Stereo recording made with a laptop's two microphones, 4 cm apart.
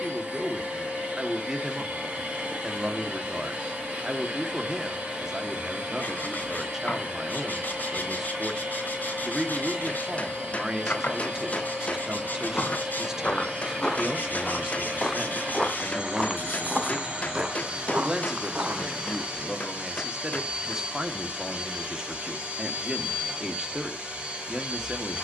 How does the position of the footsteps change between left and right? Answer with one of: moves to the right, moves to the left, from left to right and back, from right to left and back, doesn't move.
moves to the right.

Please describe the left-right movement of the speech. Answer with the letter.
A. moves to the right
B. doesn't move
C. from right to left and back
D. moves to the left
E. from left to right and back
B.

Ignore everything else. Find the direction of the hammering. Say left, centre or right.
left.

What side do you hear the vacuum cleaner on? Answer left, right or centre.
right.